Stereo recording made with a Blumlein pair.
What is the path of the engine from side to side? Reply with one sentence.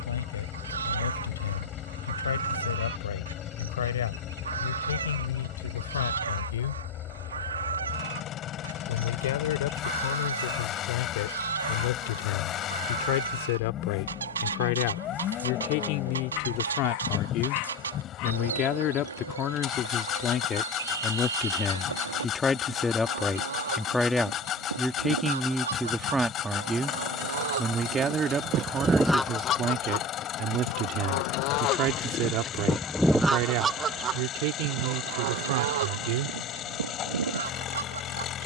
You can hear the engine stay put.